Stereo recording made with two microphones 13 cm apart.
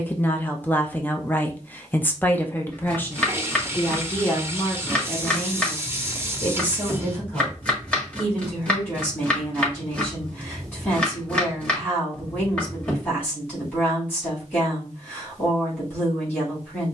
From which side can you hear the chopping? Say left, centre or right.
centre.